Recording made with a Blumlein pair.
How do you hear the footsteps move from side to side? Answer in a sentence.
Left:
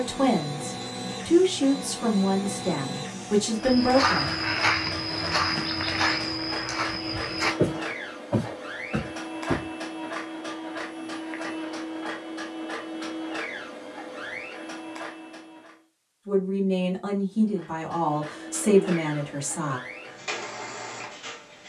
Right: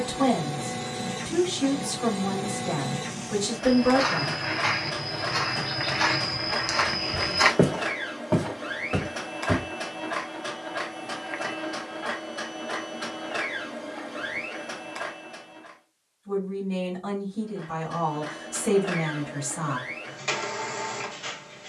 In this clip you hear the footsteps go from the left side to the right.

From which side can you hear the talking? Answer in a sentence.
In this clip you hear the talking on the left.